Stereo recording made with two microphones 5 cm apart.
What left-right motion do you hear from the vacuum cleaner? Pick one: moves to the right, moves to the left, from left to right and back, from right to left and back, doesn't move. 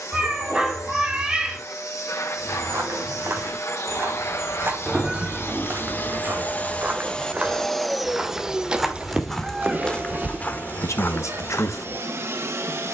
moves to the right.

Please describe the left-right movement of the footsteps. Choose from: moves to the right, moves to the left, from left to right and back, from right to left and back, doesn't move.
moves to the left.